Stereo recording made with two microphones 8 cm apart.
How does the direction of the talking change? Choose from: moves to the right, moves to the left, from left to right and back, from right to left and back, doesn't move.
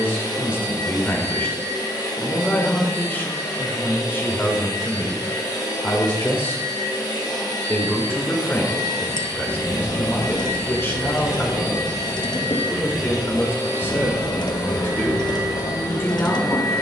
doesn't move.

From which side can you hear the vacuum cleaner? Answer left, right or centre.
left.